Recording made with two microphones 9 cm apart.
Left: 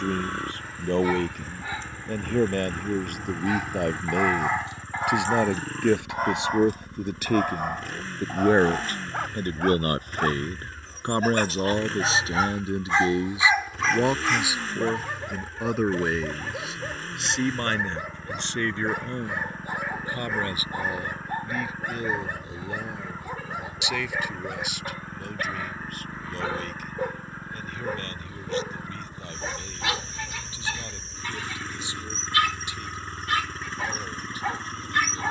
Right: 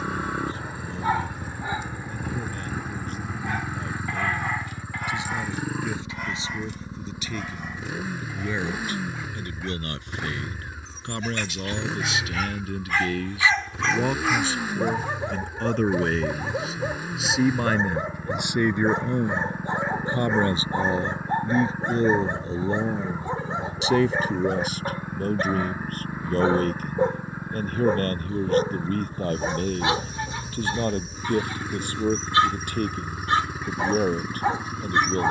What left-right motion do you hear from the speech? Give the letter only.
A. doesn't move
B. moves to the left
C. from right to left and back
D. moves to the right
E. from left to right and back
D.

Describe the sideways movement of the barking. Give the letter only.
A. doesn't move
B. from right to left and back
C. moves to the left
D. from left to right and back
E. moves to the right
B.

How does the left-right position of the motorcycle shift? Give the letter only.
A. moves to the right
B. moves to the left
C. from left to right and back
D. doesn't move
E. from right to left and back
D.